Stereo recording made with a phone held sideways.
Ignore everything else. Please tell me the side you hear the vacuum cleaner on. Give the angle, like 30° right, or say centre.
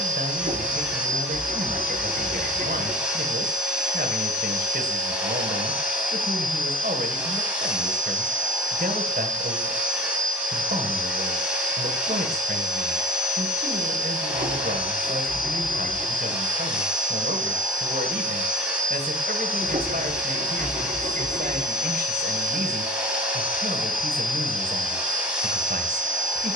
10° right.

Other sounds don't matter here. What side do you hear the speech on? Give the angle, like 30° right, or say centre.
80° right.